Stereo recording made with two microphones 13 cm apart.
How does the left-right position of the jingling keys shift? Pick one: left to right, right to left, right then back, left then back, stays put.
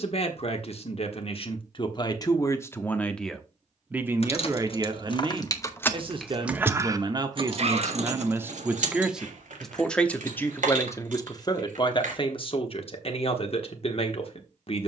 left to right.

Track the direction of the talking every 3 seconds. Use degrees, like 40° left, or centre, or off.
40° left, 20° right, 30° right, 20° left, 50° left.